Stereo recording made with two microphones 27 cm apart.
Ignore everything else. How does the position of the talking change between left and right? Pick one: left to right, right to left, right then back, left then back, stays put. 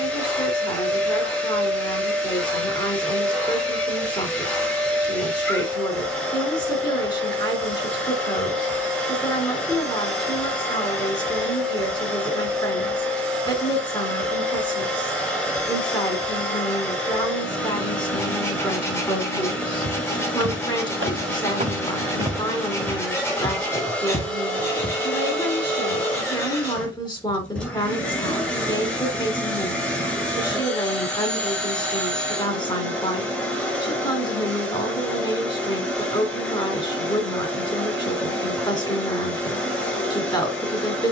stays put.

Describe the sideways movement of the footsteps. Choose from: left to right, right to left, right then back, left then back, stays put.
right to left.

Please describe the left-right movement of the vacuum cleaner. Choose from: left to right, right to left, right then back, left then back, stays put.
stays put.